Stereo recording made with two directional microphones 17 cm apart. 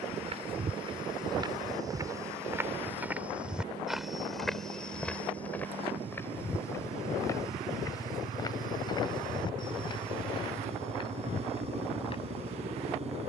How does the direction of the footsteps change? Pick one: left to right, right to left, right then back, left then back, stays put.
right to left.